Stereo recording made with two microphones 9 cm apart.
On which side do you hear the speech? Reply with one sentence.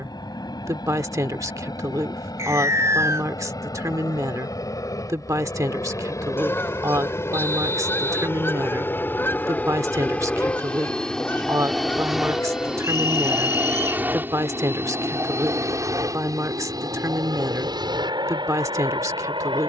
You can hear the speech on the right.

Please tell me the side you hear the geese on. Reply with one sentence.
You can hear the geese on the left.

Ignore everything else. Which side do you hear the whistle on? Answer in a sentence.
In this clip you hear the whistle on the right.